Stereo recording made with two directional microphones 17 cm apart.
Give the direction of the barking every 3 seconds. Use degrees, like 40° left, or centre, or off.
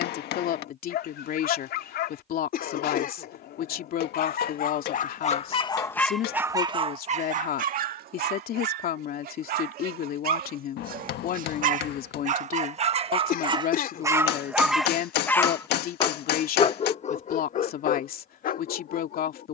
70° left, 50° left, 40° right, 60° right, 20° right, 40° left, 60° left.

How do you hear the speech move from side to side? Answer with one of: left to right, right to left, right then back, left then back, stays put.
stays put.